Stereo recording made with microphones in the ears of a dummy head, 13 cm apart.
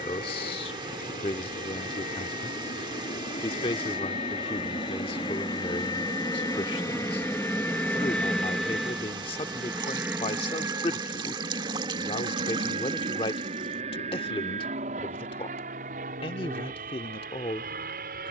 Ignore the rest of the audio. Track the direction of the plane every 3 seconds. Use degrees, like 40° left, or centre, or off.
60° left, 40° left, 20° left, 20° right, 40° right, 50° right.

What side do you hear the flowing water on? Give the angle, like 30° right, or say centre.
30° right.